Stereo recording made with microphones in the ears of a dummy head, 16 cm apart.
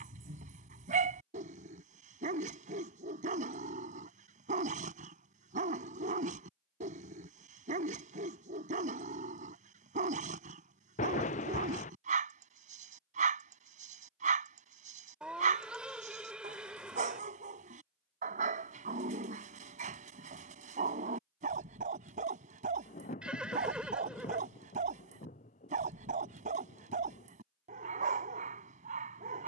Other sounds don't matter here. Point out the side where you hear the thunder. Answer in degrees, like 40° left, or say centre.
40° left.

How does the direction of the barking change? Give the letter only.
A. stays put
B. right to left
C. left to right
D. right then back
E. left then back
A.